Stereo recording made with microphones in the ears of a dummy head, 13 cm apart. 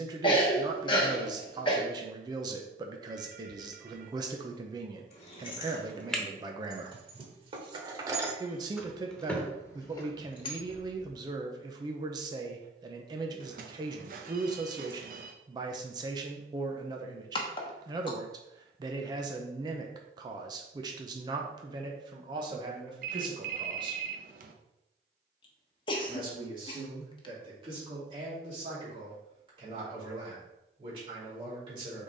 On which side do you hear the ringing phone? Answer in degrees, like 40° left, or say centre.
60° right.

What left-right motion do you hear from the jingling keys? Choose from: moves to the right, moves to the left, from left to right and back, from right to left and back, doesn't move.
from left to right and back.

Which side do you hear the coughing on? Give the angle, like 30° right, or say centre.
30° left.